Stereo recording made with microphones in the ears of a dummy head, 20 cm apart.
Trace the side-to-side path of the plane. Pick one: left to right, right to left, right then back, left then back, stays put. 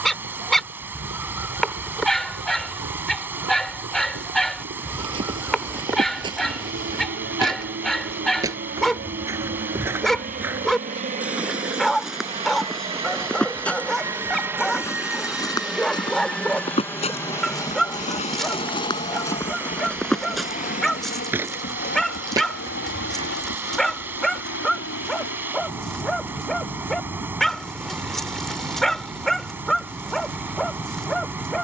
right to left.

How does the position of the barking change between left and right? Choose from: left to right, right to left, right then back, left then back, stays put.
stays put.